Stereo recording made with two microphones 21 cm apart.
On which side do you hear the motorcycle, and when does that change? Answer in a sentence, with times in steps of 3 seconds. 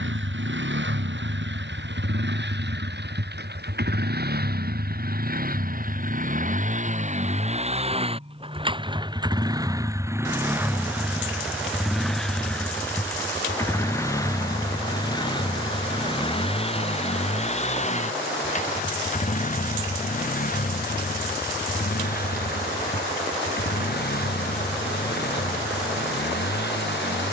You can hear the motorcycle on the right from 0 s, in the centre from 9 s and on the left from 15 s.